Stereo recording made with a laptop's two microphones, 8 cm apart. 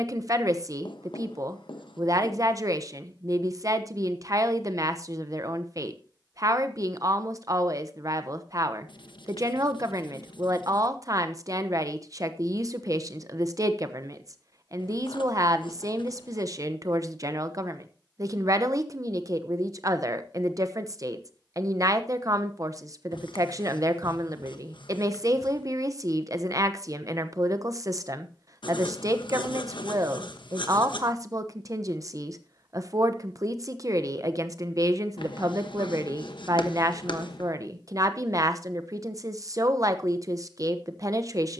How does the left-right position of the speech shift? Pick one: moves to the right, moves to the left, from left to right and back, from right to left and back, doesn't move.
doesn't move.